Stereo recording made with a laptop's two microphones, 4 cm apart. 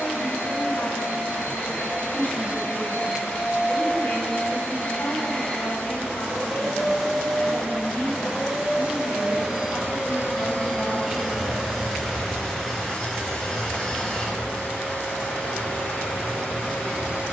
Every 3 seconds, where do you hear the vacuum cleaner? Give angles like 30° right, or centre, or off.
50° left, 30° left, centre, centre, 20° left, 40° left.